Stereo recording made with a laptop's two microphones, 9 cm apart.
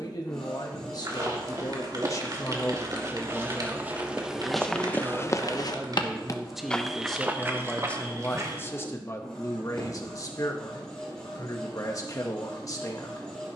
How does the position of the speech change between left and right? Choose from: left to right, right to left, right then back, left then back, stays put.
right then back.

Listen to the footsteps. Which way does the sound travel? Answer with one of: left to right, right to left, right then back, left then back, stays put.
left then back.